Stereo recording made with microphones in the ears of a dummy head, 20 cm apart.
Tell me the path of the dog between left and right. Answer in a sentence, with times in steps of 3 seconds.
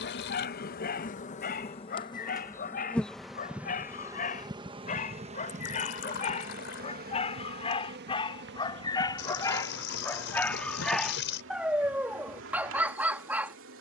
You can hear the dog on the left from 0 s and in the centre from 9 s.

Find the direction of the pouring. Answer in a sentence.
In this clip you hear the pouring on the left.